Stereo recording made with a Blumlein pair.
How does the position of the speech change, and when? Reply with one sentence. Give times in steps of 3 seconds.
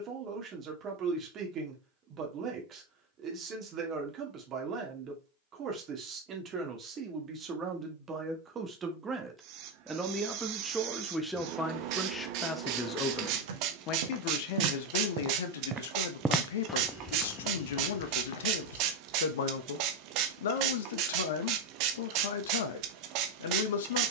In this clip you hear the speech on the right from 0 s, in the centre from 9 s and on the left from 12 s.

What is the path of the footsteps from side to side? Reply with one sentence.
You can hear the footsteps go from the right side to the left.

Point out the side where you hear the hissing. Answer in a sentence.
You can hear the hissing on the right.